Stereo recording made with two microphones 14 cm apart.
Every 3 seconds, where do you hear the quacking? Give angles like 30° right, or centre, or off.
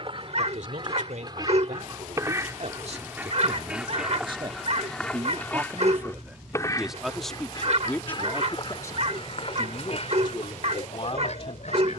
30° right, centre, 30° left, 50° left.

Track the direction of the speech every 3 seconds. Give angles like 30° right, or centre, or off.
60° right, 30° right, 10° left, 40° left.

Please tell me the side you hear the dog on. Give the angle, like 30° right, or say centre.
50° right.